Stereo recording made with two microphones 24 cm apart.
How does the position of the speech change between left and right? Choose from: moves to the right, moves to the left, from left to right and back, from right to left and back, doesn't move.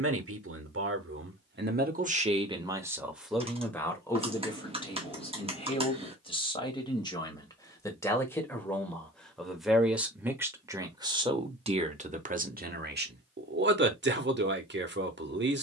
from right to left and back.